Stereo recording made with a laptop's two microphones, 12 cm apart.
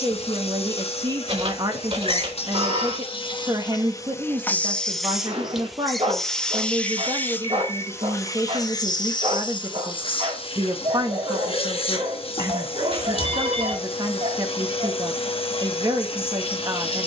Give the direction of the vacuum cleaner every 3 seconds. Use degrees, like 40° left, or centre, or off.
60° left, 20° left, 20° left, 50° left, 50° left, 50° left.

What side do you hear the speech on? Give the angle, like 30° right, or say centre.
40° right.